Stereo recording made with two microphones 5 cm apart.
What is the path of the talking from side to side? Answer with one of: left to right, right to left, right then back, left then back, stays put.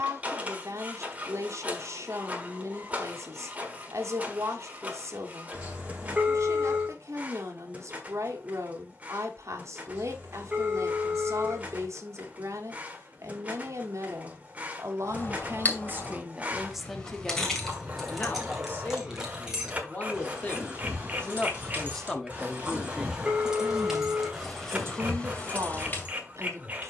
left then back.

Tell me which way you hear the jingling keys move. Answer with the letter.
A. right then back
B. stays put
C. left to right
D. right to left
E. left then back
A.